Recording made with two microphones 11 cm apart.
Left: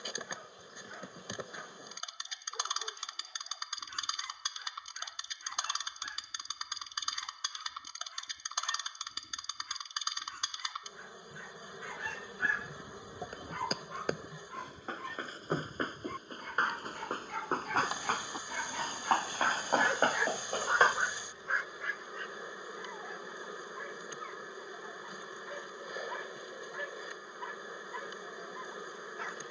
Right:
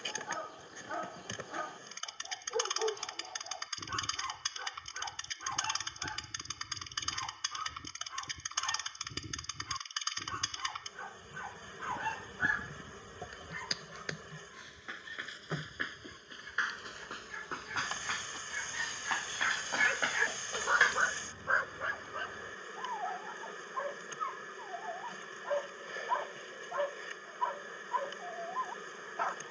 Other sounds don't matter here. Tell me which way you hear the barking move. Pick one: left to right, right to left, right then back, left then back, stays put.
left then back.